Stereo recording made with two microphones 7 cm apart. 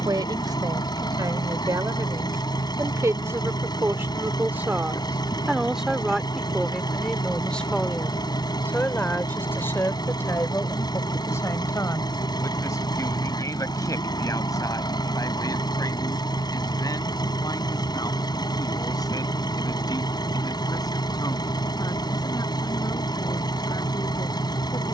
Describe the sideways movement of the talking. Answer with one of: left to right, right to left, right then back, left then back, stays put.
right to left.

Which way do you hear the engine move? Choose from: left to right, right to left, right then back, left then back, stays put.
stays put.